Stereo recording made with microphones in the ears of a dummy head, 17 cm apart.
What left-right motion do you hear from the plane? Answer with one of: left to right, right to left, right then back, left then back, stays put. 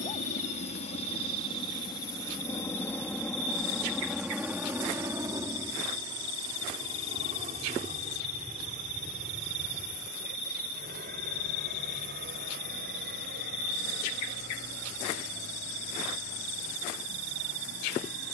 left to right.